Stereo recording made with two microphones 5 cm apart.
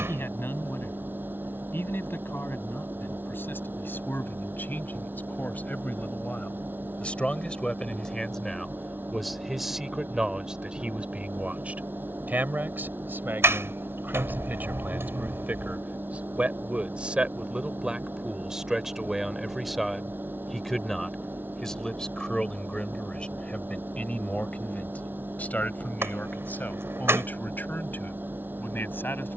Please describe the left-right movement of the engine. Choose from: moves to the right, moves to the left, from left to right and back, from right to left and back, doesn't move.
doesn't move.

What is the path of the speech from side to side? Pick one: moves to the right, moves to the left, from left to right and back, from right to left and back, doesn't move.
from left to right and back.